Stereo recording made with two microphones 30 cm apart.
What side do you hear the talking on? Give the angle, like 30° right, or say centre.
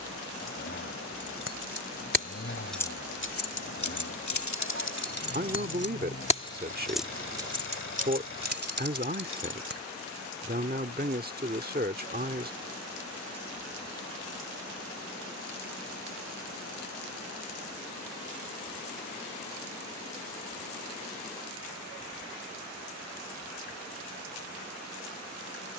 30° right.